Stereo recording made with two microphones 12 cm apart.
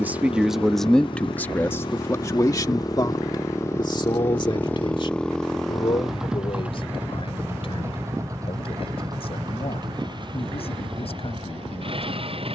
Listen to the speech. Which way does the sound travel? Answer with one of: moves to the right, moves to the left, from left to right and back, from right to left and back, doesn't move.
moves to the left.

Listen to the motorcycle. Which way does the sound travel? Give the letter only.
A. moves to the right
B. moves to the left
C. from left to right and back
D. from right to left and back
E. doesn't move
A.